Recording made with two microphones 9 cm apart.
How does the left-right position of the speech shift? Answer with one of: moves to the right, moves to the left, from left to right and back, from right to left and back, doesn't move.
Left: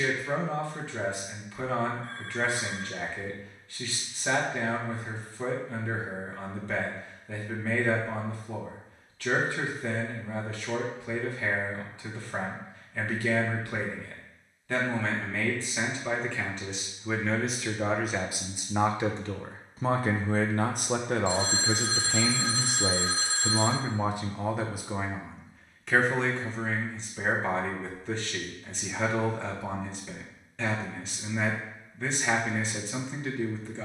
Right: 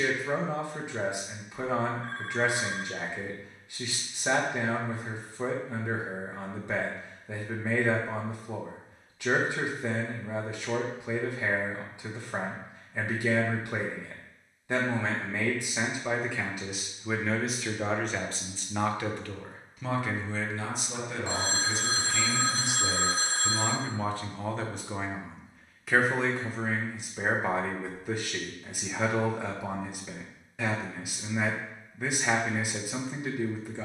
from right to left and back.